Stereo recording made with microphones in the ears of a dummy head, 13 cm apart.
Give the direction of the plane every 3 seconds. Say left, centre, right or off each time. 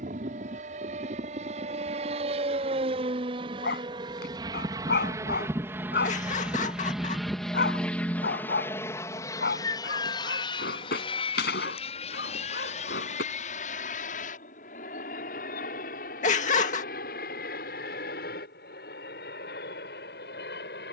right, right, centre, left, left, left, left.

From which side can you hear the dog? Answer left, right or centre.
left.